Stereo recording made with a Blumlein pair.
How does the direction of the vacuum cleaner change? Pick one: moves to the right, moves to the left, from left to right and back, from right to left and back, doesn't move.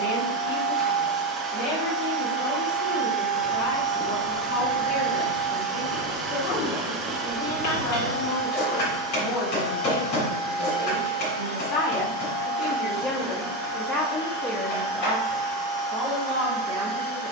moves to the left.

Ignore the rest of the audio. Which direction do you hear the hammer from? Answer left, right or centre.
left.